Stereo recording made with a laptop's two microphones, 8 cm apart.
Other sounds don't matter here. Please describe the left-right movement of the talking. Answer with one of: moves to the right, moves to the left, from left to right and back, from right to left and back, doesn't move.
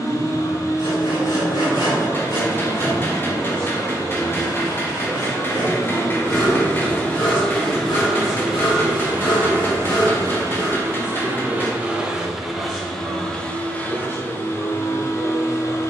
from left to right and back.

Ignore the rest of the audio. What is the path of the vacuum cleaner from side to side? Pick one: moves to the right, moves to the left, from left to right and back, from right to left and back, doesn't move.
from left to right and back.